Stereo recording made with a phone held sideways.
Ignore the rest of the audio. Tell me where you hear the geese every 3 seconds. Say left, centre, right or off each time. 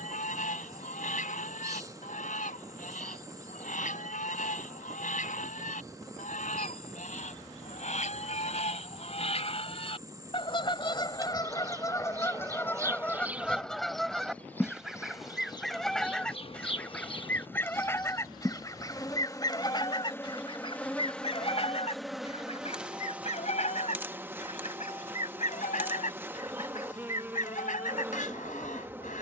left, left, left, left, centre, centre, left, left, left, left.